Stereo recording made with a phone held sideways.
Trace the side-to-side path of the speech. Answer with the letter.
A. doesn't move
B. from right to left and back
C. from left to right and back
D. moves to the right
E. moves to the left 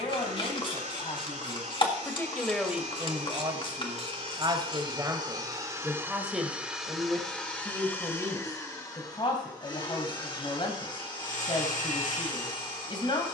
C.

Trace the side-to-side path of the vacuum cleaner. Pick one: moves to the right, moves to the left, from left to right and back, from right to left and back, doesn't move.
moves to the left.